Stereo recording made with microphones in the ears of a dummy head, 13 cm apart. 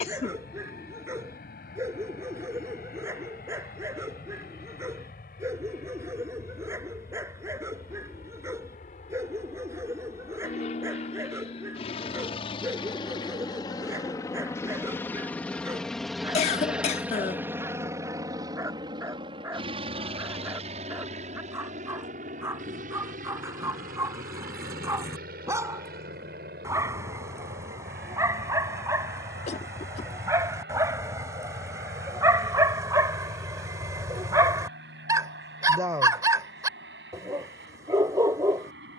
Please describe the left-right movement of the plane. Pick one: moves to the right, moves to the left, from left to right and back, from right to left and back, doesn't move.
moves to the right.